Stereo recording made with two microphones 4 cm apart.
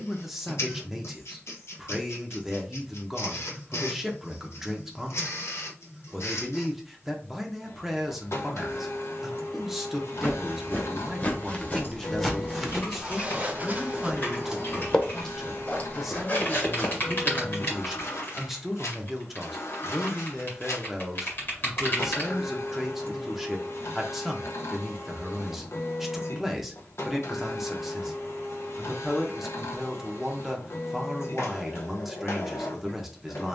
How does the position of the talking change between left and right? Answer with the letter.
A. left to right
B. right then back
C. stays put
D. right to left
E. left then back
C.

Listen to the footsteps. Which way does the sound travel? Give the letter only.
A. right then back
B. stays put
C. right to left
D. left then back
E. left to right
A.